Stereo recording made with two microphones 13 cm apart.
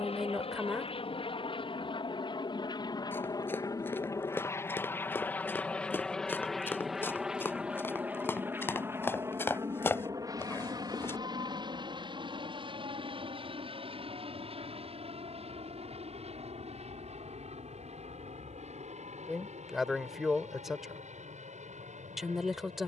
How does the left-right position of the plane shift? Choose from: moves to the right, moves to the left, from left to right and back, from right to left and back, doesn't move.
moves to the right.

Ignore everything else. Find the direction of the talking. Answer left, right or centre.
centre.